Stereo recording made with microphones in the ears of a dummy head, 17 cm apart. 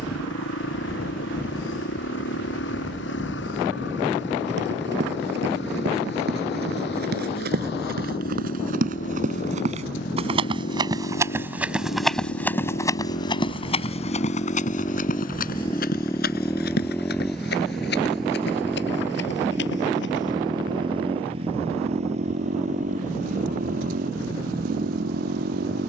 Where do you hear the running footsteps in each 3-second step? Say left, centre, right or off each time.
off, right, right, right, left, left, left, off, off.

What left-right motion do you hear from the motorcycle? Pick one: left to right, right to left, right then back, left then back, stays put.
left to right.